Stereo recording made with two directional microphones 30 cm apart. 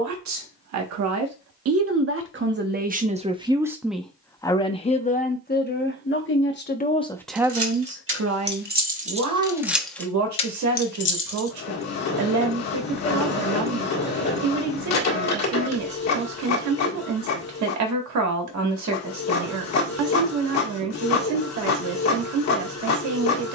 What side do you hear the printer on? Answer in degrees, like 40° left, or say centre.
60° left.